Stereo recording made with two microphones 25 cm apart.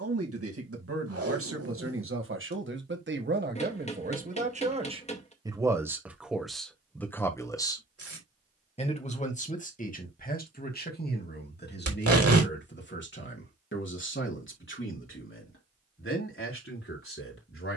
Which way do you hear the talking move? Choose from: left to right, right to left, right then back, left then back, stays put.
right to left.